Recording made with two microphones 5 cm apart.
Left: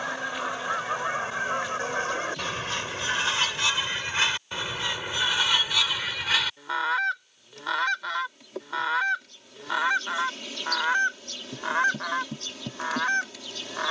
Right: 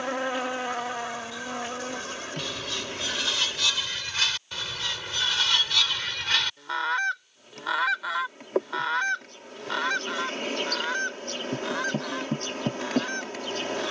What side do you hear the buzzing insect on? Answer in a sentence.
In this clip you hear the buzzing insect on the right.